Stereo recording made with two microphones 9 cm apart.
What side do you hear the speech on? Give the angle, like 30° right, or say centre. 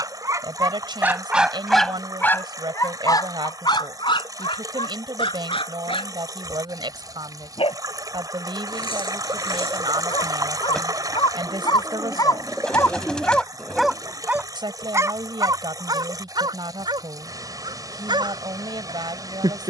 60° right.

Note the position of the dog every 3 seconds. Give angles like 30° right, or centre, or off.
10° right, 60° left, 80° left, 70° left, 10° left, 50° right, 60° right.